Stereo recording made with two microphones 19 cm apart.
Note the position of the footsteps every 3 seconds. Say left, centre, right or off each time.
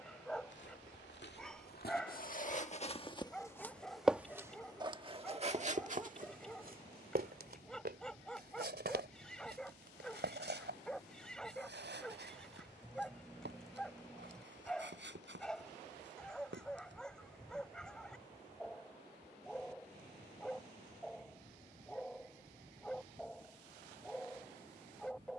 left, centre, right, right, right, right, off, off, off.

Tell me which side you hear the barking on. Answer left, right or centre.
centre.